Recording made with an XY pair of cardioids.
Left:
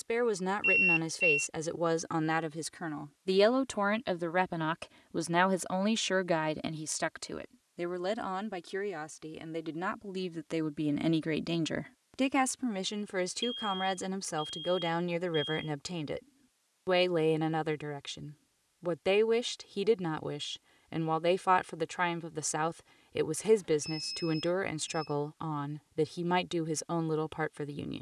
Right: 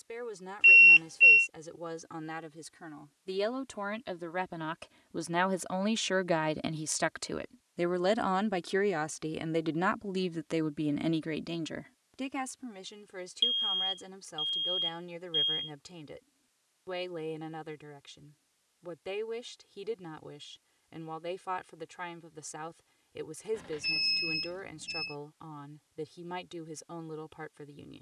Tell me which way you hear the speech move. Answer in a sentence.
In this clip you hear the speech go right and come back.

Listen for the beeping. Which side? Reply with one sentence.
You can hear the beeping on the right.